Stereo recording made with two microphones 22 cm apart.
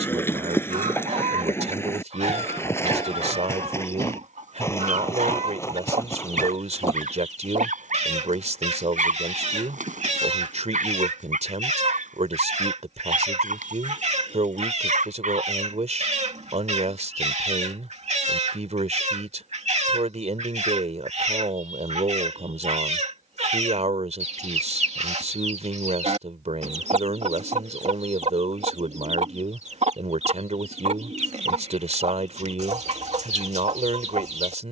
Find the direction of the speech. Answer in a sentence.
You can hear the speech on the right.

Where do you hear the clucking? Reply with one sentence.
You can hear the clucking on the right.